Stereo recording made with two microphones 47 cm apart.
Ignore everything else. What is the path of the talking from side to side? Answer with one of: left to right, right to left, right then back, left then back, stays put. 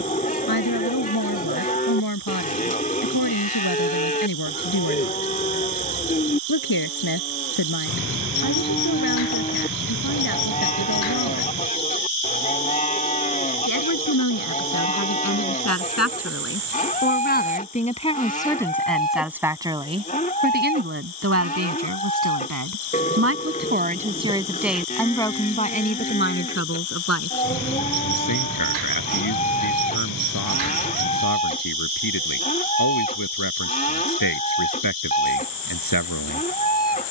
right then back.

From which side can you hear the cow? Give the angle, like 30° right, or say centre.
20° left.